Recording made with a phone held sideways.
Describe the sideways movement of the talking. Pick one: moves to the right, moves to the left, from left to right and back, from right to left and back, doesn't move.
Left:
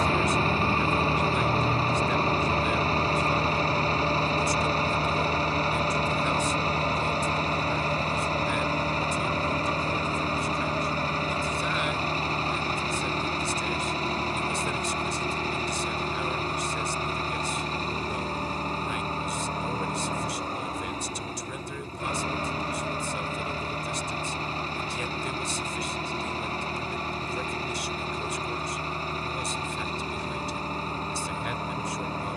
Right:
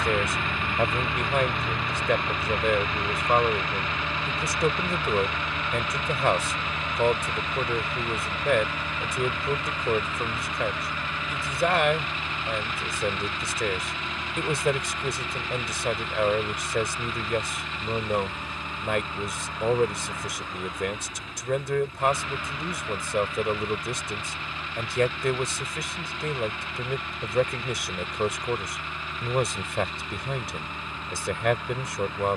doesn't move.